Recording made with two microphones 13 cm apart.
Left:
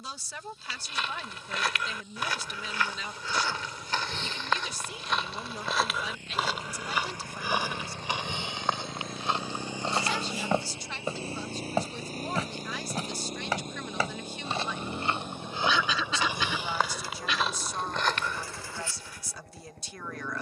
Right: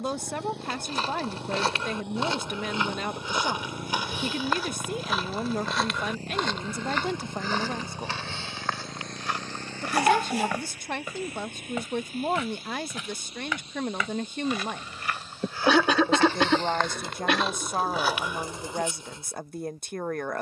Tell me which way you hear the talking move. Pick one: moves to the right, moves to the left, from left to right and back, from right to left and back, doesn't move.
doesn't move.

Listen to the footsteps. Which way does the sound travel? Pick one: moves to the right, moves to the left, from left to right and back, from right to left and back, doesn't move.
from right to left and back.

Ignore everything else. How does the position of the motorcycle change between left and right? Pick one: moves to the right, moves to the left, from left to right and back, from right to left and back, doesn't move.
moves to the left.